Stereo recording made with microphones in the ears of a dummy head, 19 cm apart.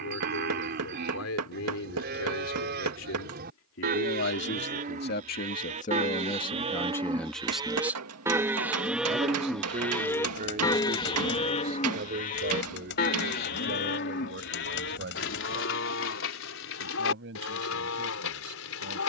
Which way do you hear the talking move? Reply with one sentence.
In this clip you hear the talking go from the left side to the right.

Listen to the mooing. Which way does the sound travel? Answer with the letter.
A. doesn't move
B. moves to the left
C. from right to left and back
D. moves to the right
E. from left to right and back
B.